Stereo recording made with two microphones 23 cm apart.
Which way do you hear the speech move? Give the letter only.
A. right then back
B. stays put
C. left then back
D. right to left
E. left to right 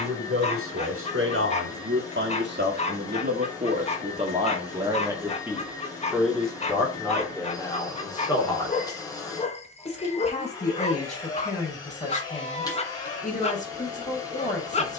D.